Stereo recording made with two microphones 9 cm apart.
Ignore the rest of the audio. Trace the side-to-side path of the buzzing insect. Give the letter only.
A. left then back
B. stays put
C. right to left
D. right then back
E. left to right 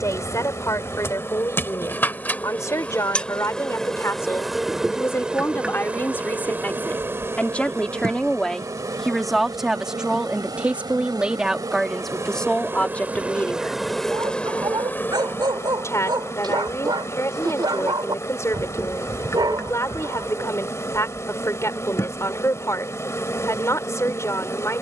D.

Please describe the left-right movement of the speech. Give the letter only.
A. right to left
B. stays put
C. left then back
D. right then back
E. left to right
D.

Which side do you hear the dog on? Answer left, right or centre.
right.